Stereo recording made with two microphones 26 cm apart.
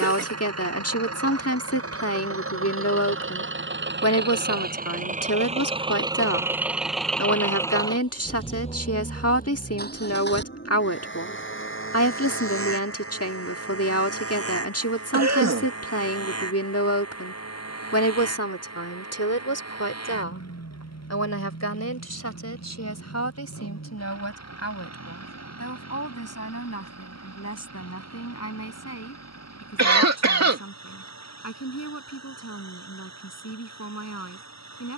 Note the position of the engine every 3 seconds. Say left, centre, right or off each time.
right, right, centre, left, left, left, left, left, left, left, left, left.